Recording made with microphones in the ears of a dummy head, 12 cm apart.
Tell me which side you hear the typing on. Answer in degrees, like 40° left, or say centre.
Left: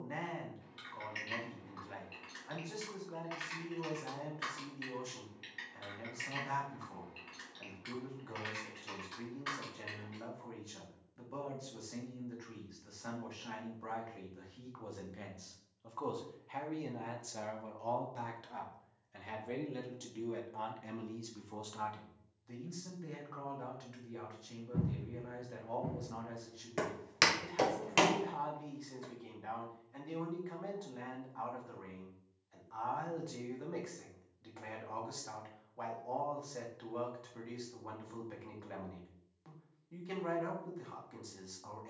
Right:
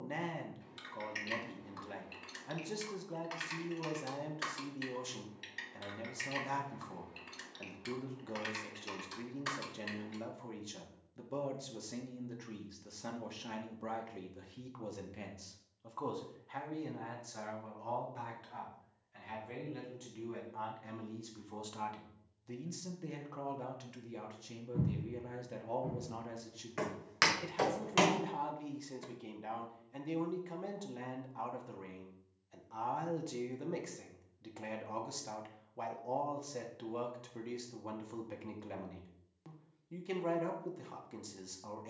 50° right.